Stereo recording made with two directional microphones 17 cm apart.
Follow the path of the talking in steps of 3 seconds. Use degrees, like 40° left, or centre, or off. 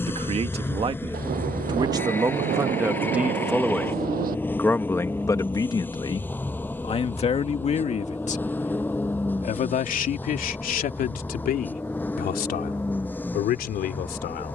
30° right, 10° left, 40° left, 60° left, 60° left.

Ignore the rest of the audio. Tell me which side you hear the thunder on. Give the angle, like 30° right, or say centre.
60° right.